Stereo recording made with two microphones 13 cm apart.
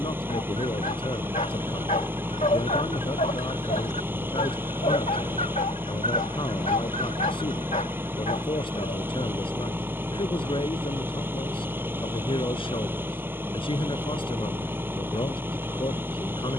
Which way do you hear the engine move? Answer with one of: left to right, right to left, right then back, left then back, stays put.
stays put.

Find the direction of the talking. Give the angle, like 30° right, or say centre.
40° left.